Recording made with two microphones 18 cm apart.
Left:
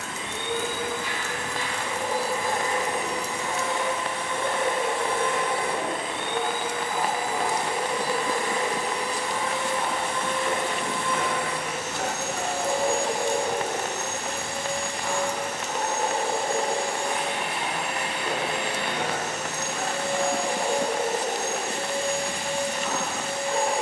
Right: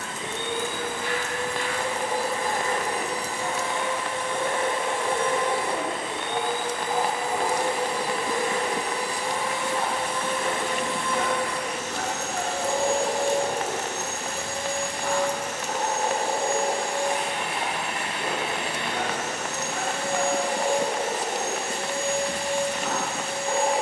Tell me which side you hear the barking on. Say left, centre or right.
right.